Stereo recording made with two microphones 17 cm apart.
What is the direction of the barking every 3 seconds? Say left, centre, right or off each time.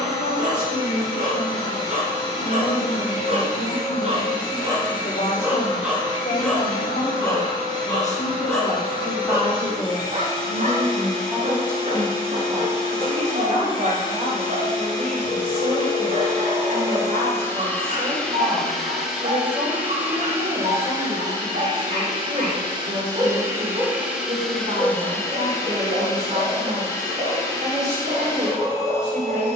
right, right, centre, right, right, right, right, right, right, right.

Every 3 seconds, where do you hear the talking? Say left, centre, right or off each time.
left, left, left, centre, right, right, right, right, right, right.